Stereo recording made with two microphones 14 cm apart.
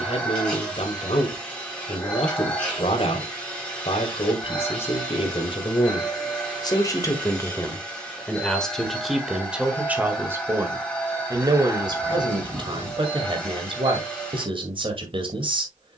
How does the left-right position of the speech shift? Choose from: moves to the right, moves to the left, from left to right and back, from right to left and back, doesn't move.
moves to the right.